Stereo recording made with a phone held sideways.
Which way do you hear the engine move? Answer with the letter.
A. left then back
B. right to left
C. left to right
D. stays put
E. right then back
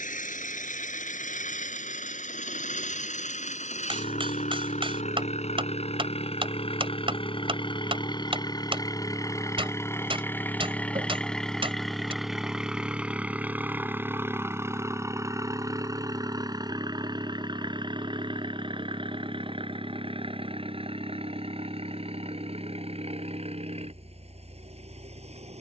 C.